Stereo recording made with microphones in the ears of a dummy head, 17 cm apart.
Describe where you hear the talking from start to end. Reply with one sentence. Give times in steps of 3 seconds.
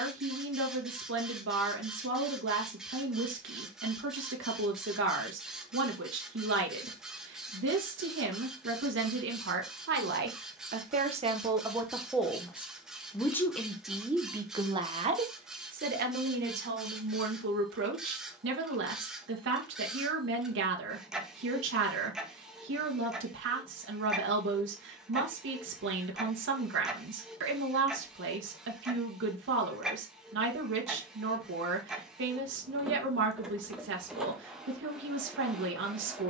In this clip you hear the talking on the right from 0 s, in the centre from 12 s and on the right from 15 s.